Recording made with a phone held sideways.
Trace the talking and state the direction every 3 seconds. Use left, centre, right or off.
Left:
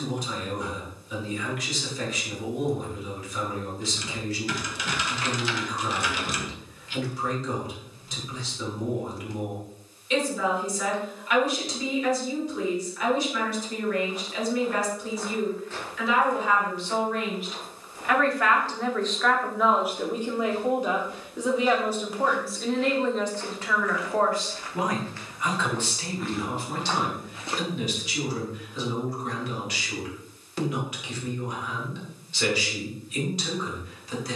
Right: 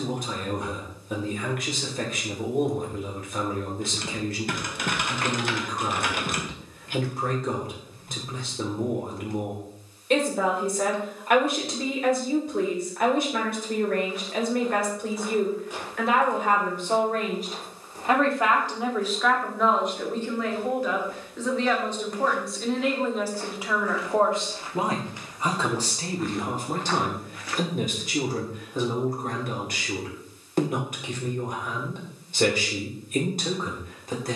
right, right, right, right, right, right, centre, centre, right, right, right, right.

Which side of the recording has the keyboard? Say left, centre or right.
right.